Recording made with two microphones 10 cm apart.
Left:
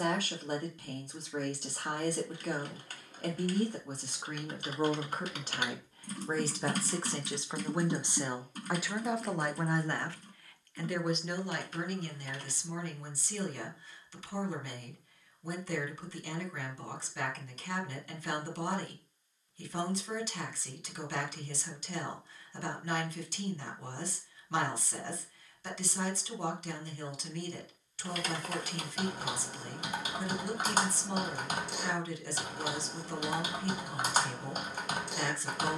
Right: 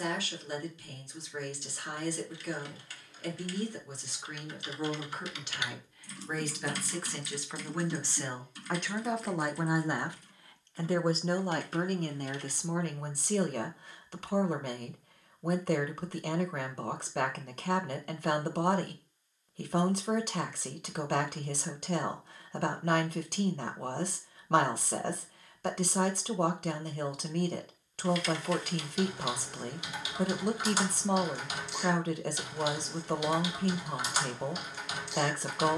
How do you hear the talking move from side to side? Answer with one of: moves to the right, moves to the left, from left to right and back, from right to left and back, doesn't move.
moves to the right.